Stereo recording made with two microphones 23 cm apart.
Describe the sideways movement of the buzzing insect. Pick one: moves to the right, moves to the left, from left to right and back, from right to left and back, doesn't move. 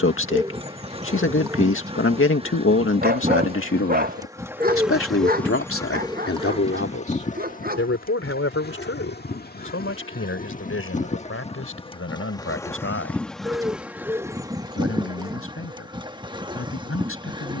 from right to left and back.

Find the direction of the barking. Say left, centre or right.
right.